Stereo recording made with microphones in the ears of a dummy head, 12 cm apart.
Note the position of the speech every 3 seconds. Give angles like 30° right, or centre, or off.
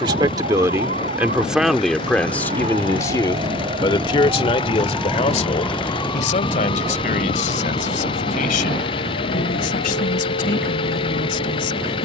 centre, 40° left, 60° left, 70° left.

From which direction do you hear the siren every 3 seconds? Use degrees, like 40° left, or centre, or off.
60° right, 20° right, 50° left, 70° left.